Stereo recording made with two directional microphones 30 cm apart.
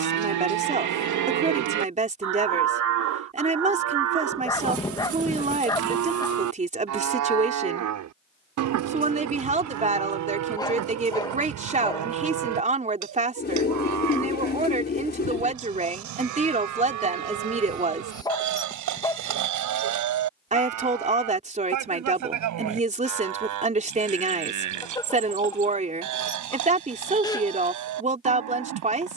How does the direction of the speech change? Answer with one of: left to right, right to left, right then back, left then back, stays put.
stays put.